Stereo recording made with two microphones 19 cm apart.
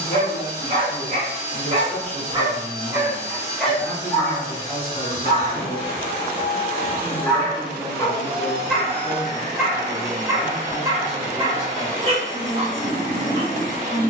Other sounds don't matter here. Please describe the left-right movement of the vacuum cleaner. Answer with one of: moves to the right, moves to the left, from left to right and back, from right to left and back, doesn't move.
doesn't move.